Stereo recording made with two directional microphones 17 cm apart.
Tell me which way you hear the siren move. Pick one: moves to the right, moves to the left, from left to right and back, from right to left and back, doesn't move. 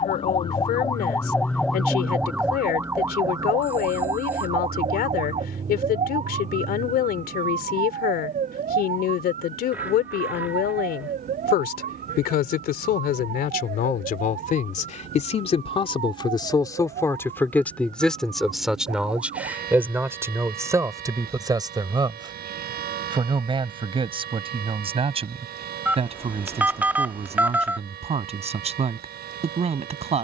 moves to the right.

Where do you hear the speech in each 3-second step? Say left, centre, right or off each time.
left, left, left, left, left, left, centre, right, right, right.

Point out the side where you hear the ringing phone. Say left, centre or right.
centre.